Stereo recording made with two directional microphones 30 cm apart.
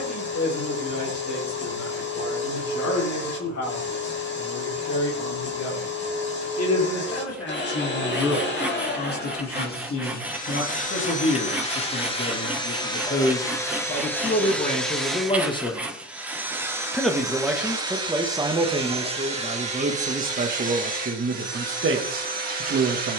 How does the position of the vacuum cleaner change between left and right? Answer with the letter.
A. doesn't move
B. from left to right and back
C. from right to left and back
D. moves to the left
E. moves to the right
E.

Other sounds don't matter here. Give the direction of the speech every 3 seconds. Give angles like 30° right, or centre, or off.
60° left, 60° left, 50° left, 40° left, 30° left, 10° left, 20° right, 40° right.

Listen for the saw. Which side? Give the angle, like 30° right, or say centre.
centre.